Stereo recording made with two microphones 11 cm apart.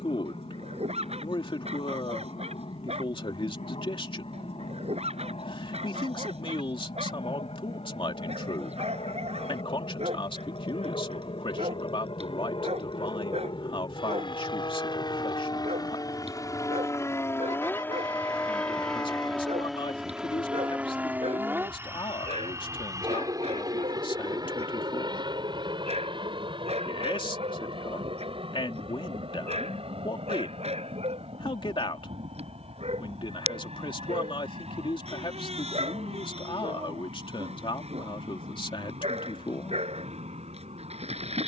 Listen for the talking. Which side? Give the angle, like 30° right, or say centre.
50° left.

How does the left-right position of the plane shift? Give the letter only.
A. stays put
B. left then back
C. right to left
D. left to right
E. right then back
D.